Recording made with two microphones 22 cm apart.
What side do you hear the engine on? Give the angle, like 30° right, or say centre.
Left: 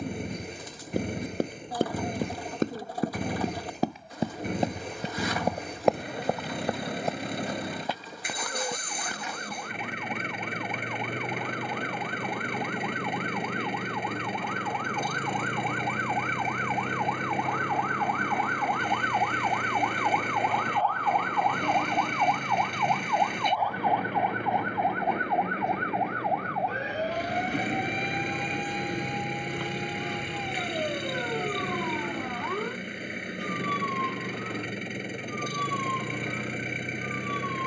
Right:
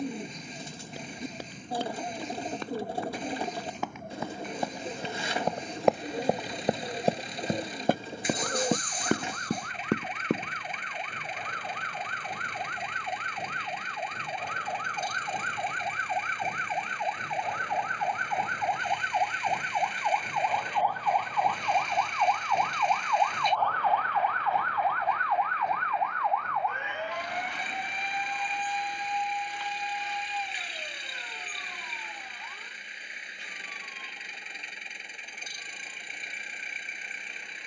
60° left.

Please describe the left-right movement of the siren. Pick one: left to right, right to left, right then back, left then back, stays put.
right to left.